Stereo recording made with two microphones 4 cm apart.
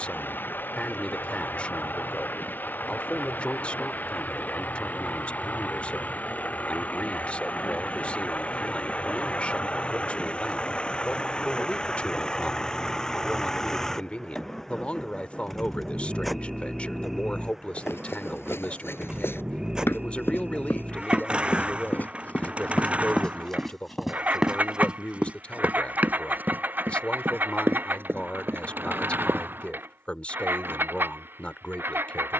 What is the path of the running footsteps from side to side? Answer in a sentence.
In this clip you hear the running footsteps move to the right.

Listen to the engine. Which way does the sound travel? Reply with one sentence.
You can hear the engine move from left to right.